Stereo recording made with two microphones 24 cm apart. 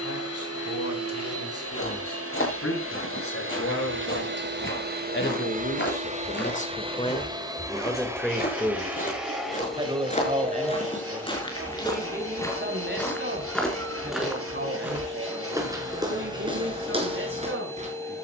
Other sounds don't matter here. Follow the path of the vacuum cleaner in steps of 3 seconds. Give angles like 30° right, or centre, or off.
70° right, 50° right, 20° right, centre, 10° left, 10° left.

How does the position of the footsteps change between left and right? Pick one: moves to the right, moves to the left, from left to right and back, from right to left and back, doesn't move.
moves to the right.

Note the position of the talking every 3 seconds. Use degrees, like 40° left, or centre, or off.
80° left, 60° left, 10° left, 30° right, 40° right, 50° right.